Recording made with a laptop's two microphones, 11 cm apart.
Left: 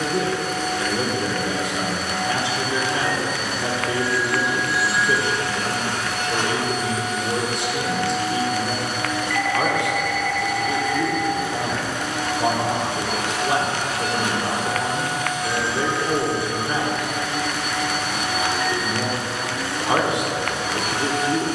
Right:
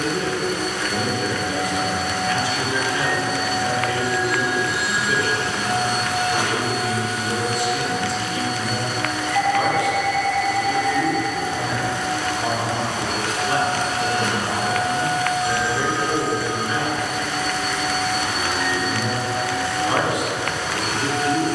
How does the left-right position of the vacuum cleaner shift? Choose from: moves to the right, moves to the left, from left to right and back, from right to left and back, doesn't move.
moves to the left.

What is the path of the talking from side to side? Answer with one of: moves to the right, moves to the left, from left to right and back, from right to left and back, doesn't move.
doesn't move.